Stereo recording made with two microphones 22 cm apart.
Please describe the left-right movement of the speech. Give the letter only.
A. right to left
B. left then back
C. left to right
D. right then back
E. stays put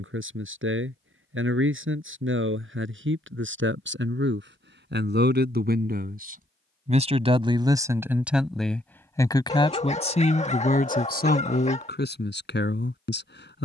A.